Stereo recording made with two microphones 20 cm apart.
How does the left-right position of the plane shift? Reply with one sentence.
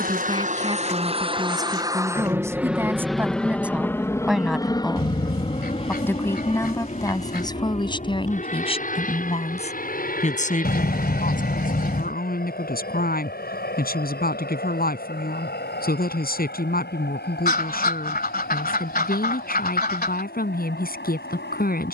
You can hear the plane travel towards the left.